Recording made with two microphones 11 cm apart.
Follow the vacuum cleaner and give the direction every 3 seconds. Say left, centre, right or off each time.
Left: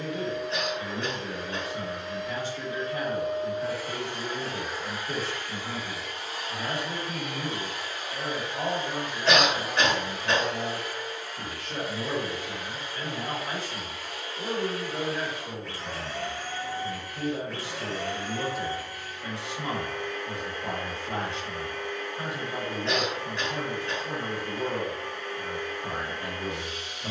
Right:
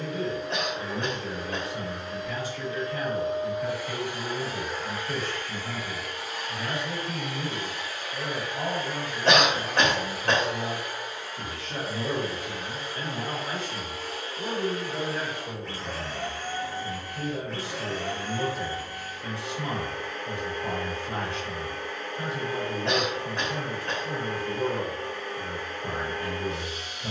right, centre, left, centre, right, right, right, right, right.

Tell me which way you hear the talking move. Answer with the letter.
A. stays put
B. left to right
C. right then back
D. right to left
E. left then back
C.